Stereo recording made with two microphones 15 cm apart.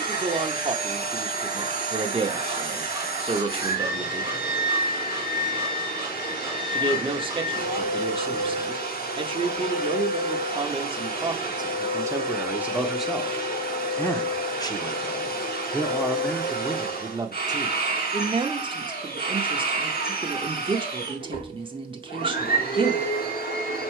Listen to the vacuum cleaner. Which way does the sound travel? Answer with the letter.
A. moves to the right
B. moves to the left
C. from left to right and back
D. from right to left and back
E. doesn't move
E.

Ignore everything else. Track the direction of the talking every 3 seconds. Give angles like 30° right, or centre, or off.
30° right, 30° right, 30° right, 30° right, centre, centre, 30° right, 30° right.